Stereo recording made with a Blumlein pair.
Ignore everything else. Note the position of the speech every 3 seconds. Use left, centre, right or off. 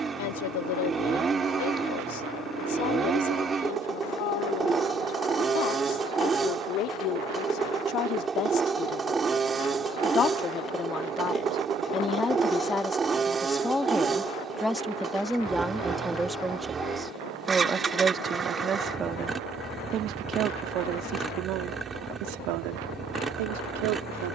left, left, left, left, centre, centre, right, right.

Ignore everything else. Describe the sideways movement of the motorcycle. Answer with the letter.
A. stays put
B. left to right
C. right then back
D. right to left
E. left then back
A.